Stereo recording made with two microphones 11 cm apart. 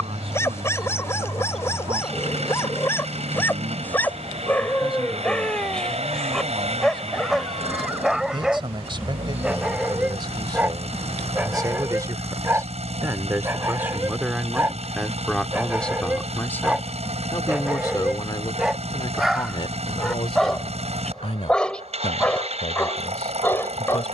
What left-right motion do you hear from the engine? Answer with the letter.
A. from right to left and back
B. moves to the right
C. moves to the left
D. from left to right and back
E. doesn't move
E.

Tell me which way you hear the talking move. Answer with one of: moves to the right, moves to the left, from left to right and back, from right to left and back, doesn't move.
moves to the left.